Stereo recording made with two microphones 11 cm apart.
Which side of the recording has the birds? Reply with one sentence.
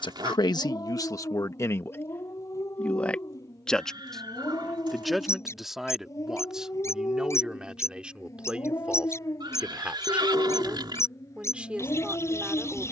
You can hear the birds on the left.